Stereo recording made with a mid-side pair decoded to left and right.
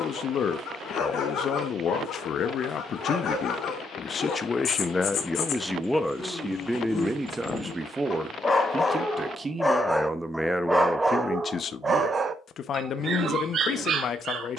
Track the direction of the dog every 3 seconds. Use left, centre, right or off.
left, left, left, centre, right.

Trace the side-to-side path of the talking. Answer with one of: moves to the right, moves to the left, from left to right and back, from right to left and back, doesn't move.
from left to right and back.